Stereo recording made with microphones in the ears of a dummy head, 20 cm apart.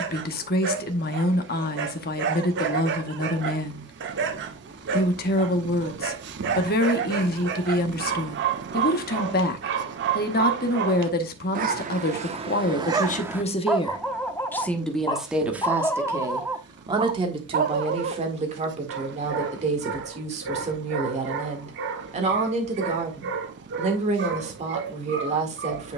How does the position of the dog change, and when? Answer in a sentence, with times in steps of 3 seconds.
In this clip you hear the dog on the right from 0 s, in the centre from 12 s and on the right from 18 s.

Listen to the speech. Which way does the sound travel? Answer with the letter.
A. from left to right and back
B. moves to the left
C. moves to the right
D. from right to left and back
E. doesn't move
C.